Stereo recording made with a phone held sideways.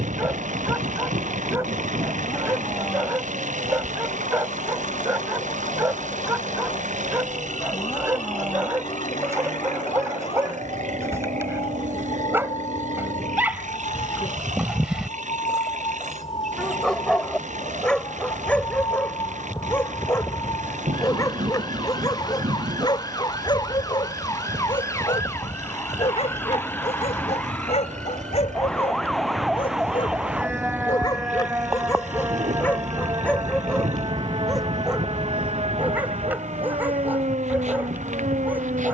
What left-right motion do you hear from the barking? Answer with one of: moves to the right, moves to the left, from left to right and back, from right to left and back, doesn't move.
from right to left and back.